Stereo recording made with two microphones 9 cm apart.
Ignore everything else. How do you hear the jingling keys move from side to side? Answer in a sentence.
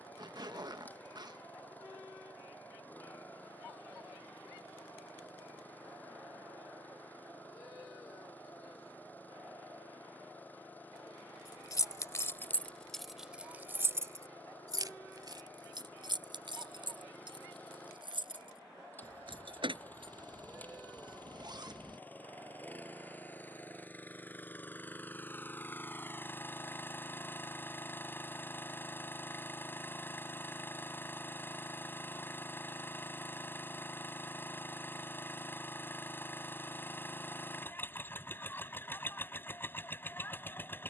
In this clip you hear the jingling keys move to the right.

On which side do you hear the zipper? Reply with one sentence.
You can hear the zipper on the right.